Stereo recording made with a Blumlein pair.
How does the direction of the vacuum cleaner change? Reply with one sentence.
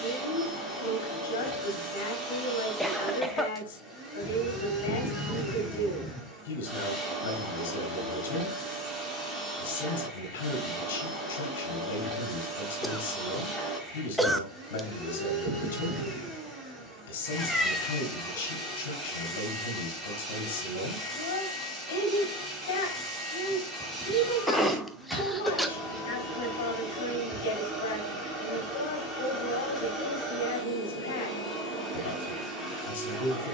You can hear the vacuum cleaner stay put.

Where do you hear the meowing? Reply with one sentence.
You can hear the meowing in the centre.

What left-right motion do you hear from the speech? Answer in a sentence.
You can hear the speech stay in one place.